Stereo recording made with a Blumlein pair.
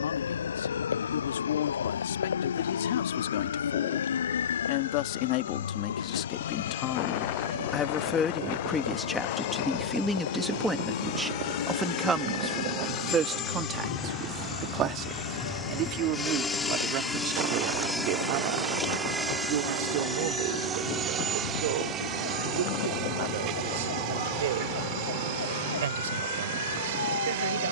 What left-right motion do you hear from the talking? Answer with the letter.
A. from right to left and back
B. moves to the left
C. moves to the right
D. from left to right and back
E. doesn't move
C.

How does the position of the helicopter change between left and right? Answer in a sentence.
In this clip you hear the helicopter move from left to right.